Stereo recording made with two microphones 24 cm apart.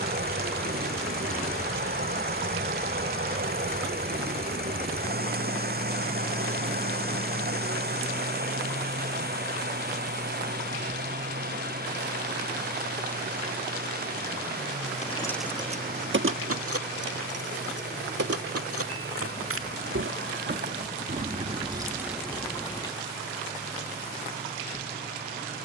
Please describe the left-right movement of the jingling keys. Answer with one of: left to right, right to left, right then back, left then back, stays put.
right then back.